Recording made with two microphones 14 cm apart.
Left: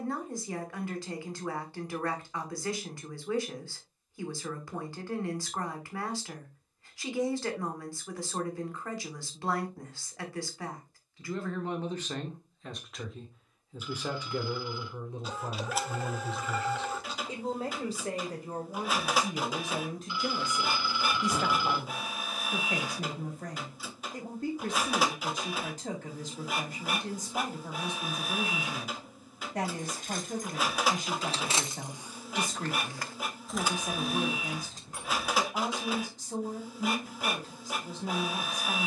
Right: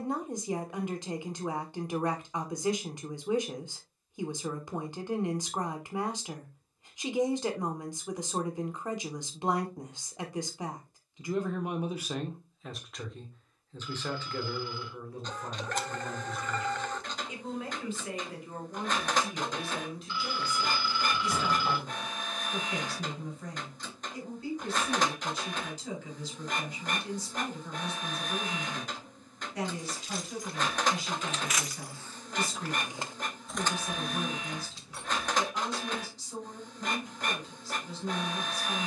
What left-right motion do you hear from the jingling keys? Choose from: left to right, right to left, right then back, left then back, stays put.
right then back.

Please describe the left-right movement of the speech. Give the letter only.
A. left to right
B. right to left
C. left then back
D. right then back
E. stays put
B.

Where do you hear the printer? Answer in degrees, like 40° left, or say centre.
10° left.